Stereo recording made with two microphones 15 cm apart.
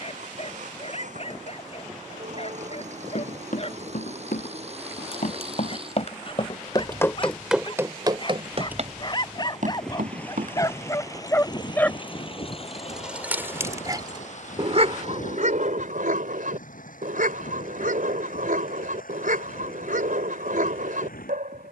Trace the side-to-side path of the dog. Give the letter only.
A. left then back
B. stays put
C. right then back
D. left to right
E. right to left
D.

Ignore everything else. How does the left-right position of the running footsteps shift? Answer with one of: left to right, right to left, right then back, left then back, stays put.
left to right.